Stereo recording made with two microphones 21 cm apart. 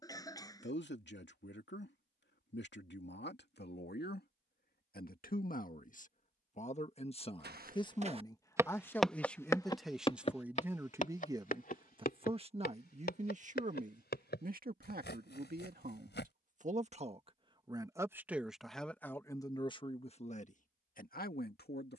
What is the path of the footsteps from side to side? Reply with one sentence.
In this clip you hear the footsteps travel towards the left.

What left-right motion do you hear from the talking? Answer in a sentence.
In this clip you hear the talking move from left to right and back again.